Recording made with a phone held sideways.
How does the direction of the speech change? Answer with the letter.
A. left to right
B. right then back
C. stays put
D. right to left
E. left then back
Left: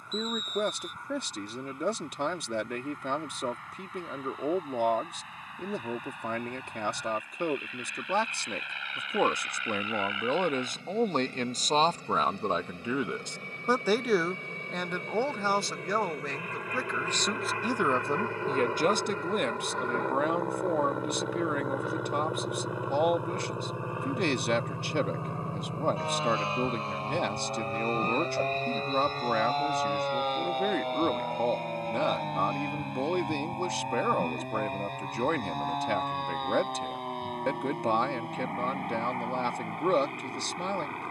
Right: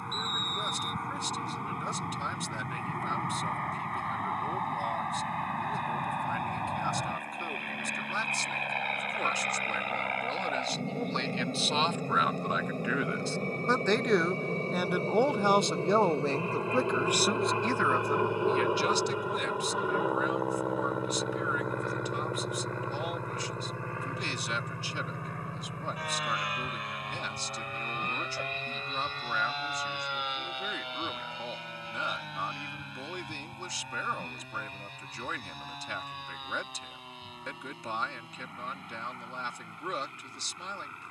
B.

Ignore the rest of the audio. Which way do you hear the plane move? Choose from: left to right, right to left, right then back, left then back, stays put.
right to left.